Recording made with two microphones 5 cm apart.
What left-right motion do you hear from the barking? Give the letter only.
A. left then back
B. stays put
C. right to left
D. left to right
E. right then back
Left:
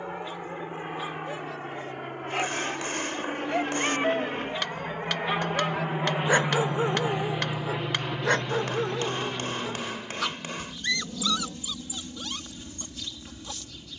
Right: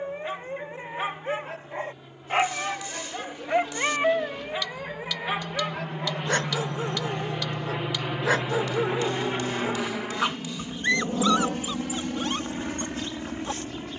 A.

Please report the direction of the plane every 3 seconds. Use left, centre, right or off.
left, left, centre, right, right.